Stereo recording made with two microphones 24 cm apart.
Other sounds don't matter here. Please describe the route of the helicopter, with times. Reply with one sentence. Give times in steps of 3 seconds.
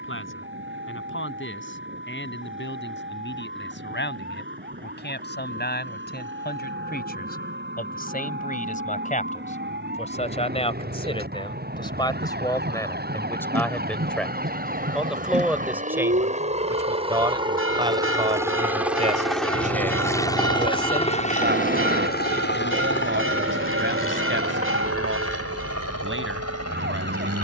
You can hear the helicopter on the right from 0 s, in the centre from 18 s and on the left from 21 s.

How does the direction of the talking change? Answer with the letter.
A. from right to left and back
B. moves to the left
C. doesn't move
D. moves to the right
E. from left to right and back
D.